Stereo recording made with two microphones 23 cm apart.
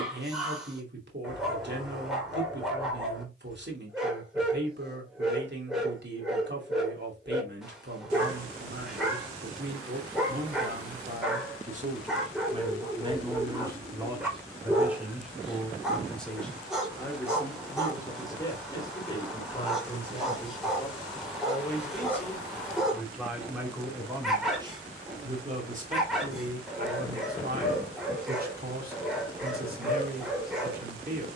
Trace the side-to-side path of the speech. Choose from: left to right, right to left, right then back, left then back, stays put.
left then back.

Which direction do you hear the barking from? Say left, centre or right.
centre.